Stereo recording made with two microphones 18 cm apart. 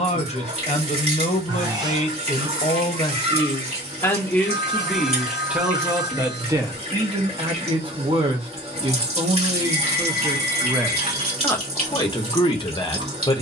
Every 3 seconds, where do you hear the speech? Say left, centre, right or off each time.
left, centre, right, centre, left.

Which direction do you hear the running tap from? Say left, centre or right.
right.